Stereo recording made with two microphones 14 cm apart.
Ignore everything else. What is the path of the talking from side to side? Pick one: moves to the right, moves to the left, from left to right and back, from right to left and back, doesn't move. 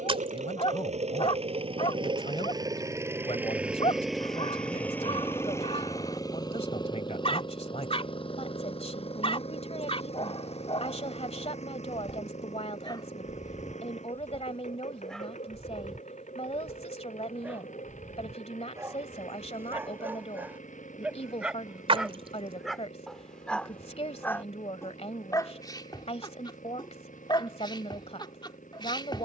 doesn't move.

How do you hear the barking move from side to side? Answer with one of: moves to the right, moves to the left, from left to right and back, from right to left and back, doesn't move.
from left to right and back.